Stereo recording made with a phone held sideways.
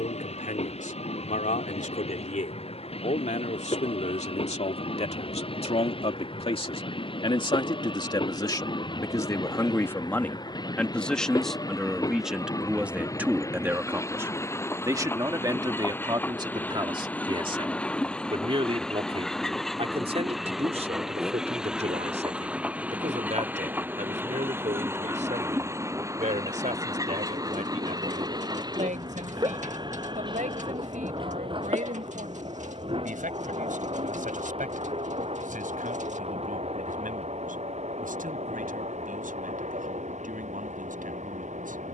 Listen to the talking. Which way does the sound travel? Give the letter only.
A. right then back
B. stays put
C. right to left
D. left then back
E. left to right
E.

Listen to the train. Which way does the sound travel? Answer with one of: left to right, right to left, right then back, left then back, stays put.
left to right.